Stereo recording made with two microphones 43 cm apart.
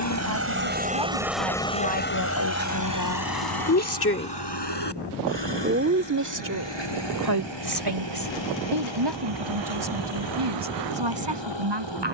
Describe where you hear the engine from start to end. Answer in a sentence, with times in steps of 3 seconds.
In this clip you hear the engine in the centre from 0 s and on the left from 3 s.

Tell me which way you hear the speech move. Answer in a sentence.
In this clip you hear the speech go from the left side to the right.